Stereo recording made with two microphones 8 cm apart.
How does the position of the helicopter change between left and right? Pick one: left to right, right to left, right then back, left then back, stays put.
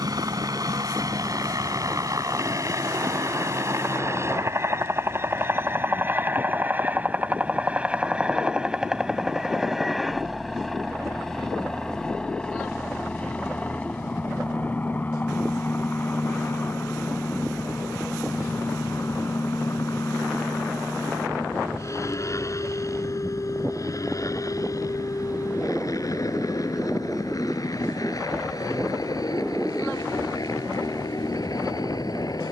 right to left.